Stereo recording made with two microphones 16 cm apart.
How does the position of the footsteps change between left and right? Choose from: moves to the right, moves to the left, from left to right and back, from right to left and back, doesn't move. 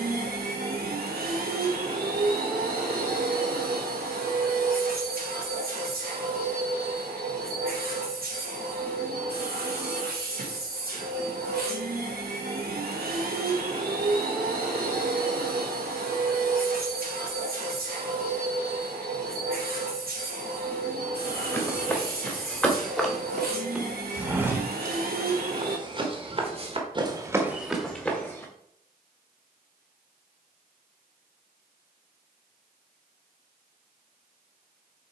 from left to right and back.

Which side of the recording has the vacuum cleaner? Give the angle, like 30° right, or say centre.
70° right.